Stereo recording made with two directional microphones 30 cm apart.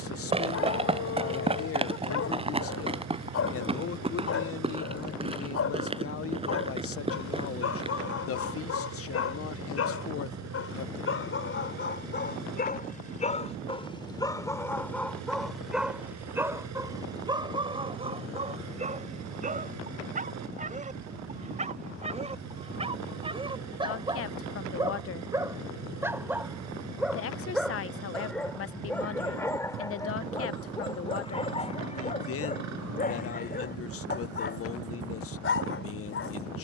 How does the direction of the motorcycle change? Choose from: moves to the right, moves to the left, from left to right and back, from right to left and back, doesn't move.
doesn't move.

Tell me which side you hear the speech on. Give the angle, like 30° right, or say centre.
50° left.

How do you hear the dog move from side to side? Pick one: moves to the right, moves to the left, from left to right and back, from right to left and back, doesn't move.
from left to right and back.